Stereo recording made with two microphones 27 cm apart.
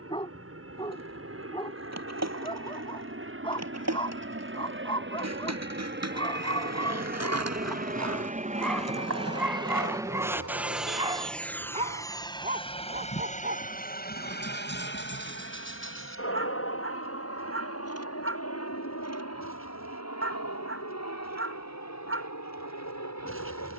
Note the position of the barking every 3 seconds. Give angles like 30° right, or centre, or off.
20° left, 20° left, 10° left, 10° right, 40° right, 50° right, 50° right, 50° right.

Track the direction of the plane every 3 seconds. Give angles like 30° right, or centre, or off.
60° right, 50° right, 40° right, 10° right, 30° left, 50° left, 60° left, 70° left.